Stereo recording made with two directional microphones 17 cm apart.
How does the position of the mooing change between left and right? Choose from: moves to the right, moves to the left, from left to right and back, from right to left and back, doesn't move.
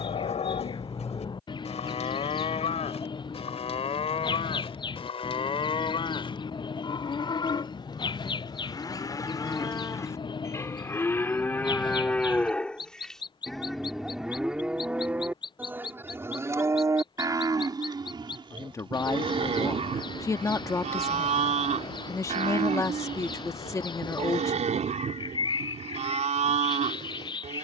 moves to the right.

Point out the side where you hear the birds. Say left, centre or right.
left.